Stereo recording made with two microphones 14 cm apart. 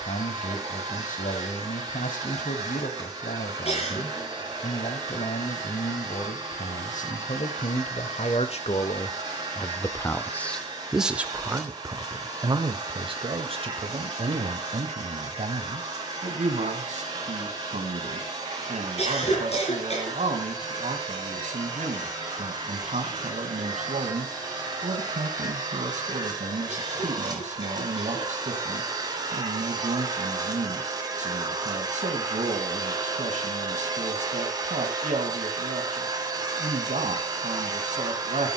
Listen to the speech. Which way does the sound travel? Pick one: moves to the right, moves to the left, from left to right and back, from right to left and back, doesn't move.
moves to the right.